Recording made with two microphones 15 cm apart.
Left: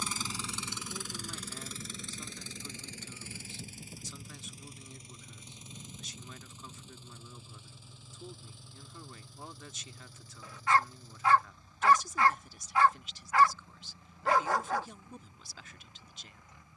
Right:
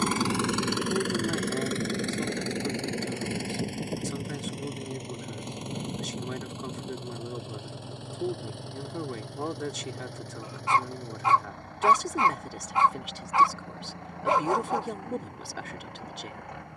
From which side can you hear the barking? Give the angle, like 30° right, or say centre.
20° right.